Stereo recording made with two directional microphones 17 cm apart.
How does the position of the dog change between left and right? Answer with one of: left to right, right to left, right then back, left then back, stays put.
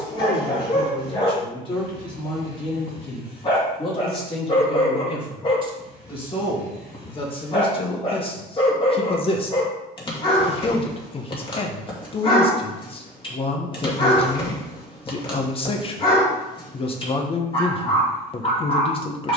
stays put.